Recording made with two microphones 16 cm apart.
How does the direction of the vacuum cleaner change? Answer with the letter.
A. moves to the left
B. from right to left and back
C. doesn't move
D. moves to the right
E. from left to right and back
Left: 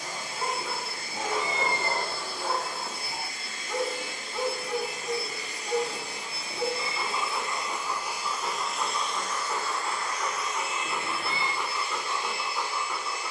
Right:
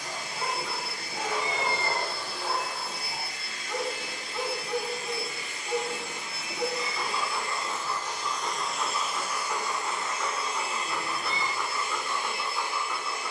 D.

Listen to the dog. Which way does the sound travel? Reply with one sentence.
You can hear the dog stay put.